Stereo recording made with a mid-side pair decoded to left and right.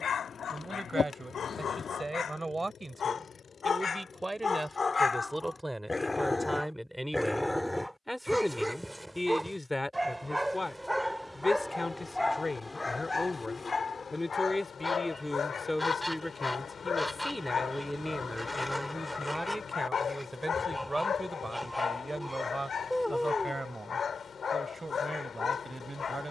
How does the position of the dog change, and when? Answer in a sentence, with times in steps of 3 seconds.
You can hear the dog on the left from 0 s, in the centre from 6 s and on the left from 12 s.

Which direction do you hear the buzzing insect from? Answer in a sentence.
You can hear the buzzing insect on the left.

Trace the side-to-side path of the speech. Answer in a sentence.
You can hear the speech go left and come back.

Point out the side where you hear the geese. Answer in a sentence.
In this clip you hear the geese in the centre.